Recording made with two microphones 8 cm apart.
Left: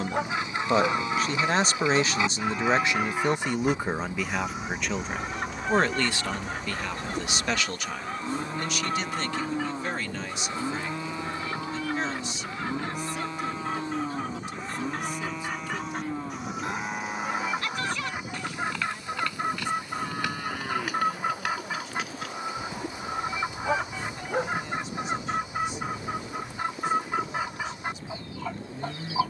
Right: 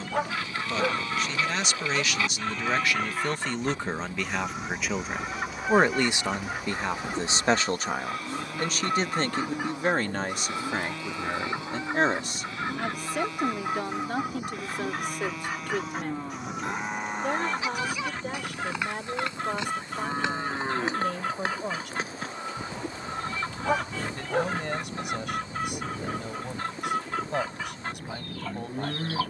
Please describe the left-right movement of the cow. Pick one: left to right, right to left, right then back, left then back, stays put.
left to right.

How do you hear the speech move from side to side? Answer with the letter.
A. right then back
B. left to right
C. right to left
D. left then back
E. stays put
B.